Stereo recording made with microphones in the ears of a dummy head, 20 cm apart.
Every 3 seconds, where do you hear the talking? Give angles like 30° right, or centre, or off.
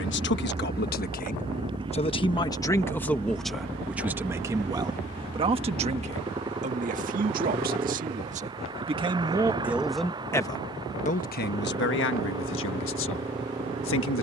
30° left, 10° right, 30° right, 20° left, 60° left.